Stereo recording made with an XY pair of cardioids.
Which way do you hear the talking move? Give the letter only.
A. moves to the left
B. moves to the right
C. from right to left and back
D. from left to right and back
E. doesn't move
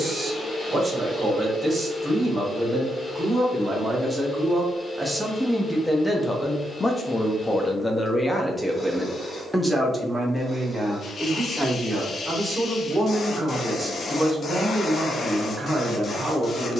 C.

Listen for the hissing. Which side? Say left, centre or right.
left.